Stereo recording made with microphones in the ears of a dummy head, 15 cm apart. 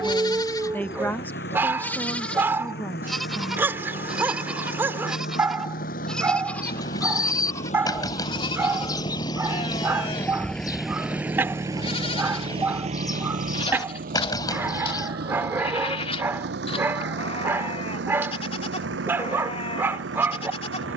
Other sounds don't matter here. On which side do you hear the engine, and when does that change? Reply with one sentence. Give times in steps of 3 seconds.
You can hear the engine on the left from 0 s, in the centre from 9 s and on the right from 12 s.